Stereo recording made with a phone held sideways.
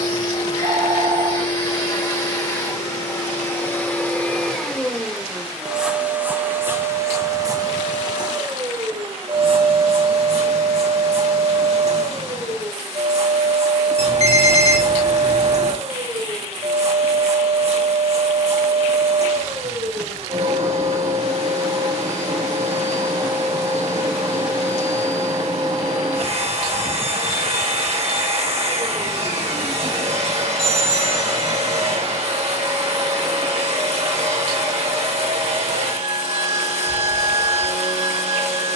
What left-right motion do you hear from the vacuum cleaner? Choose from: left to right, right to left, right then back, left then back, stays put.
left to right.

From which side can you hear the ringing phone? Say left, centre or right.
right.